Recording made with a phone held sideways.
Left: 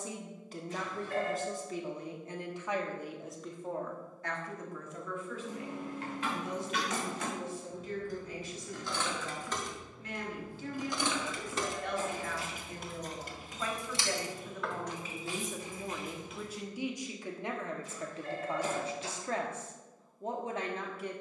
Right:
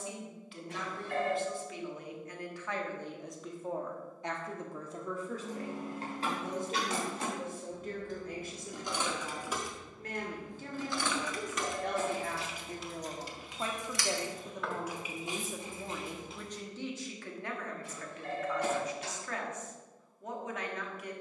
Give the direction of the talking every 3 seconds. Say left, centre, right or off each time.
left, right, right, right, right, centre, left.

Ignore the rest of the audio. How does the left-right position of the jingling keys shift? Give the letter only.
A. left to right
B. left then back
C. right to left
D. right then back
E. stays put
B.